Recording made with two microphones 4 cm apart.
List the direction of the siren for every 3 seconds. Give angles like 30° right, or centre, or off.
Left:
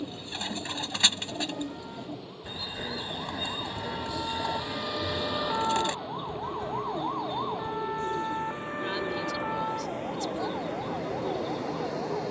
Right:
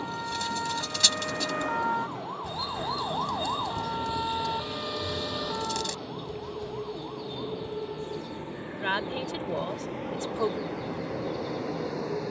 60° right, 10° right, 50° left, 60° left.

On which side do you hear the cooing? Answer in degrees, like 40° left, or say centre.
30° left.